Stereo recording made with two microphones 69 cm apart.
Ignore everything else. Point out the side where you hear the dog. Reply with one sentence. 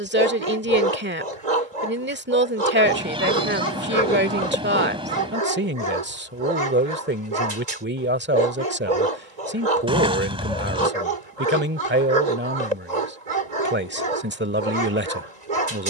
In this clip you hear the dog on the right.